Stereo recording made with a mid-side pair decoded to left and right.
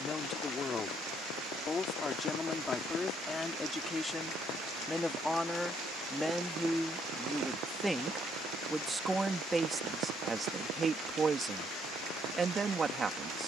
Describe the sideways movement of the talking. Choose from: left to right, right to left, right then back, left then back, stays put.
left to right.